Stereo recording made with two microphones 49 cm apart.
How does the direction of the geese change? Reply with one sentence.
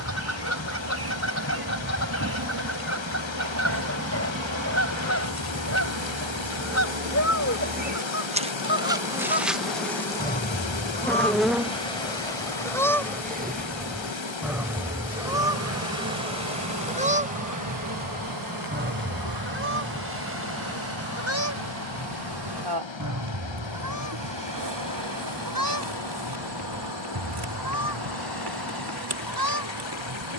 You can hear the geese move to the right.